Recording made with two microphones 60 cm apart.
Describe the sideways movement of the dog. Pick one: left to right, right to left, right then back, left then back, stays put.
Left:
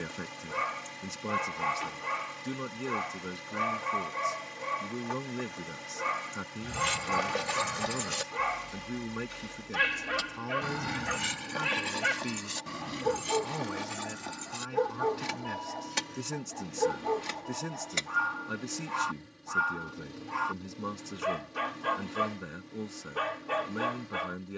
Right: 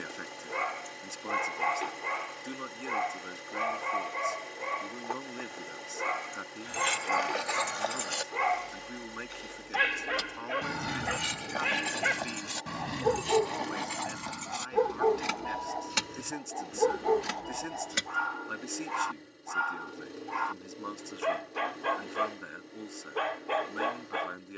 stays put.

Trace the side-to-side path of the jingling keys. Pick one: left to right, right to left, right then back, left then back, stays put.
left to right.